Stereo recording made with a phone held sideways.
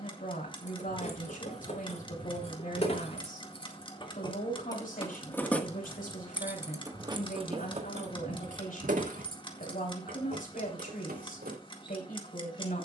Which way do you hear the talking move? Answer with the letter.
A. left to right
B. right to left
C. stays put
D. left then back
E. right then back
C.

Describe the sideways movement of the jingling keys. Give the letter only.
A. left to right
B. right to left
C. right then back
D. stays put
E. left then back
A.